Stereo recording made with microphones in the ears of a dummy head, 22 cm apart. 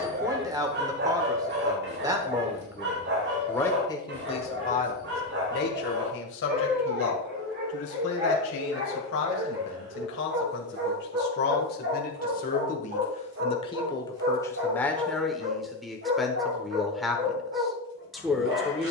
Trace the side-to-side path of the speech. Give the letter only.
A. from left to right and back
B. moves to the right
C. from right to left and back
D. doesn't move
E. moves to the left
C.